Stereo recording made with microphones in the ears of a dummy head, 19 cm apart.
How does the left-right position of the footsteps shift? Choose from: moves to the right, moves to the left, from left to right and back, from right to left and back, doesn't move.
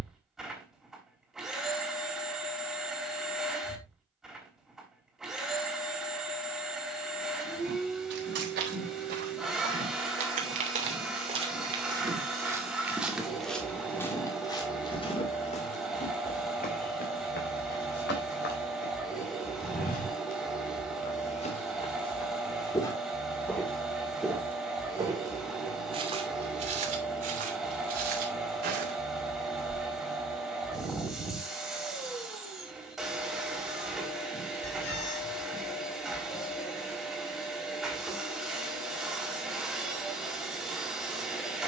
from right to left and back.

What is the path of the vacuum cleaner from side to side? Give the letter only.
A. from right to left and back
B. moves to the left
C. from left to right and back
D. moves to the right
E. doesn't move
E.